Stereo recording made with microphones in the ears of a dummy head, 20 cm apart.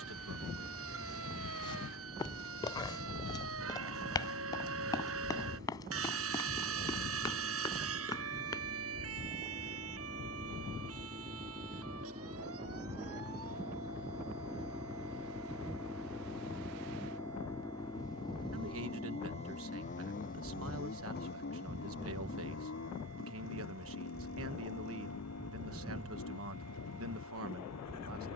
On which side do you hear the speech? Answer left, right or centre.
right.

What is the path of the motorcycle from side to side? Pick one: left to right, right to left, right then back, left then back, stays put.
right to left.